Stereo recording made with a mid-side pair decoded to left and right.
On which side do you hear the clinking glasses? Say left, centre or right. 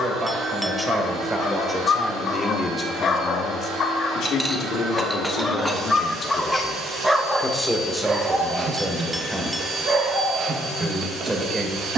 centre.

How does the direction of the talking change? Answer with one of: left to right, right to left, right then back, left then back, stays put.
left then back.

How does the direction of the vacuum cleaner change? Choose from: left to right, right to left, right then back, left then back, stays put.
stays put.